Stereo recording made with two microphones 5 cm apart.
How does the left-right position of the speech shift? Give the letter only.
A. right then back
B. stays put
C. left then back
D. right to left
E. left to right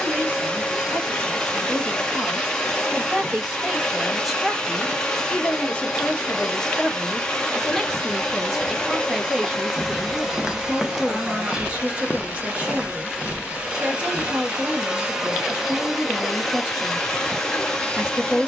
C.